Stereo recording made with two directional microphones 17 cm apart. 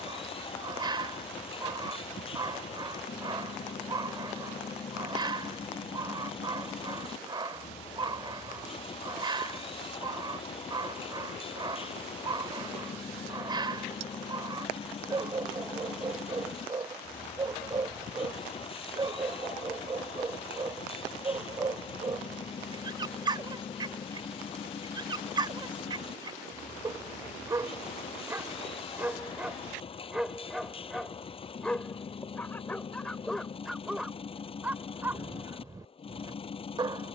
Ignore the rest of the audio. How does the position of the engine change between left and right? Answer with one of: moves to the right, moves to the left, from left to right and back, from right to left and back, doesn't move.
doesn't move.